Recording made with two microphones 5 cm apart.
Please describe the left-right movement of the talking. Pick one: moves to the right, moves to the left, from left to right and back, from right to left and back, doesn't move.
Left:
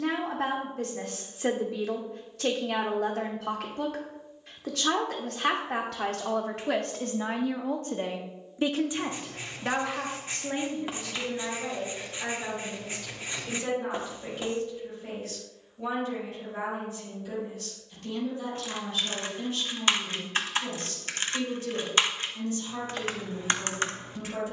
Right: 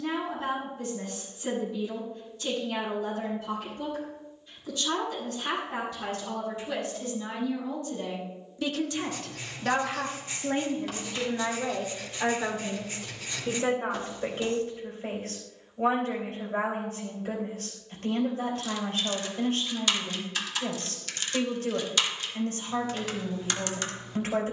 moves to the right.